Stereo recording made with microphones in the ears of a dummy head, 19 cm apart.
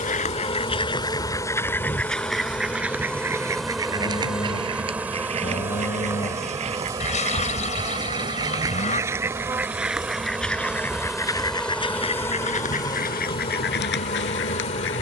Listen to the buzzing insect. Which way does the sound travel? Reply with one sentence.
You can hear the buzzing insect move from left to right and back again.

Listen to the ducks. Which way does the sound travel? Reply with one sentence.
You can hear the ducks move from left to right and back again.